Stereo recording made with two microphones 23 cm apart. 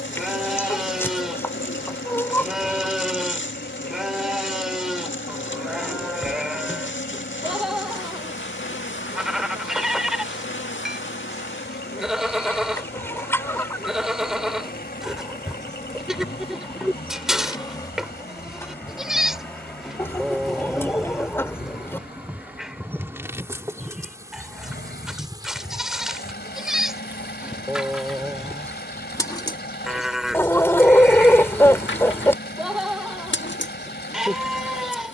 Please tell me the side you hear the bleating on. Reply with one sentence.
You can hear the bleating in the centre.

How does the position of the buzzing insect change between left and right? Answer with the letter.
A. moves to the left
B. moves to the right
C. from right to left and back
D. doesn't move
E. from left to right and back
E.